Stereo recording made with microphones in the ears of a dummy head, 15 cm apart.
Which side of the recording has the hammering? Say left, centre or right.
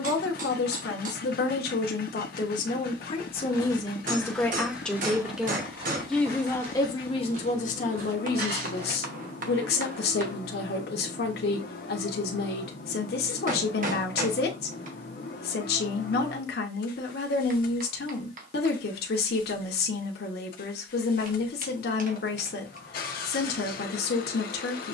right.